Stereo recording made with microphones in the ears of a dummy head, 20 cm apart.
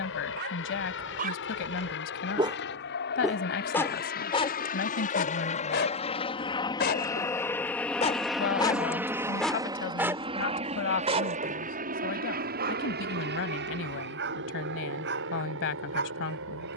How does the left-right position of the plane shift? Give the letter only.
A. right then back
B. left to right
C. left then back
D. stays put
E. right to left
B.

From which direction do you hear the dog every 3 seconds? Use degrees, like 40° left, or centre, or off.
40° right, 20° left, 30° left, 20° right, 50° right, 50° right.